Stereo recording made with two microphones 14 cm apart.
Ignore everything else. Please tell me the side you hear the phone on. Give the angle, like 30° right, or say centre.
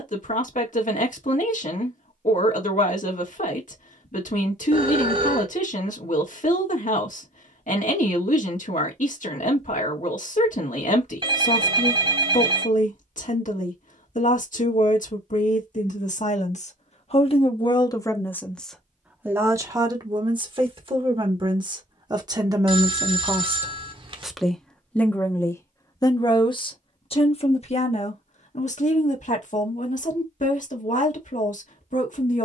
40° right.